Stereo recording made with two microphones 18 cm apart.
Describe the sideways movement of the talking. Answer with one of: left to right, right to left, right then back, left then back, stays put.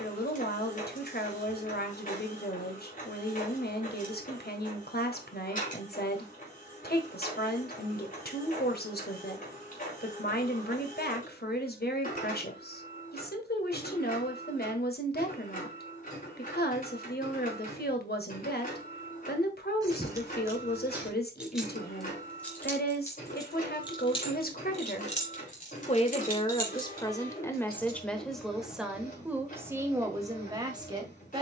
left to right.